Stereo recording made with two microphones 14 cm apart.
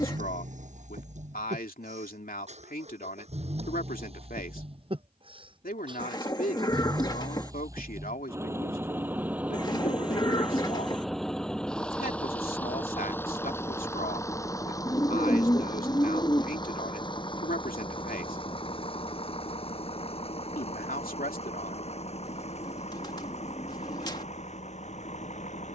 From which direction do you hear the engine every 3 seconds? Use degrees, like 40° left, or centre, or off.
60° right, 40° right, 20° right, centre, 20° left, 30° left, 40° left, 50° left, 50° left.